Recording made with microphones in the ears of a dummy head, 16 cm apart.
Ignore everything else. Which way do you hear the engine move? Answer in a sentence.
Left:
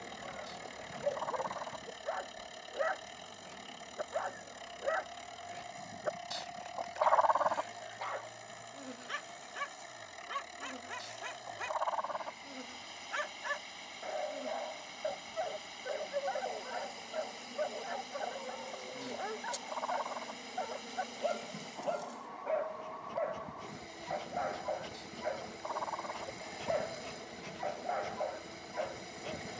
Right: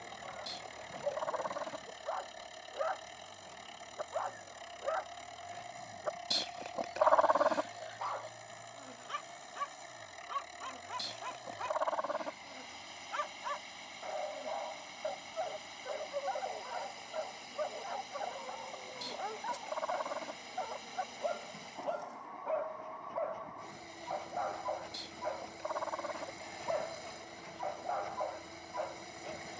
In this clip you hear the engine stay in one place.